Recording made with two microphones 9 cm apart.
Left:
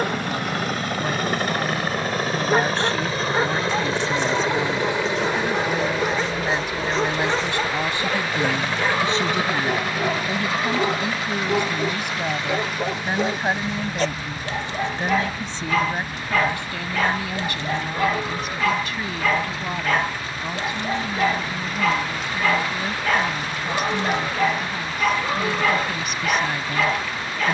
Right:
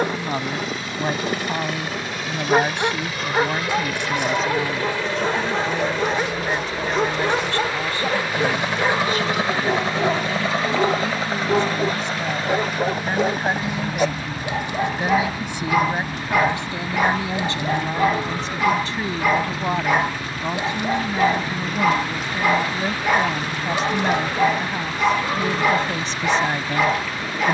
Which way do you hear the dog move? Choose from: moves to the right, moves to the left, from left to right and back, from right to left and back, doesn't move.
doesn't move.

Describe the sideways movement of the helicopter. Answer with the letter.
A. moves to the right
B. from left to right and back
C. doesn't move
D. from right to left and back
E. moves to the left
A.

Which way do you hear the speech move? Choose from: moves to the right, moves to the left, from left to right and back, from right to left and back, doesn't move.
from right to left and back.